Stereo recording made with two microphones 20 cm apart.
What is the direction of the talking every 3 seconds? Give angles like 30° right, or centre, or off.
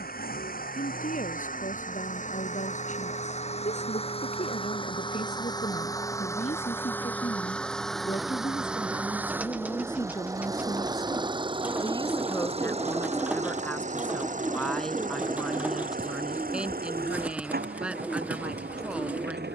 40° left, 30° left, 30° left, 20° left, 10° left, centre, 10° right.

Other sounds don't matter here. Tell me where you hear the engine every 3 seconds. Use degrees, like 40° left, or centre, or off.
40° left, 30° left, 10° left, 20° right, 40° right, 50° right, 50° right.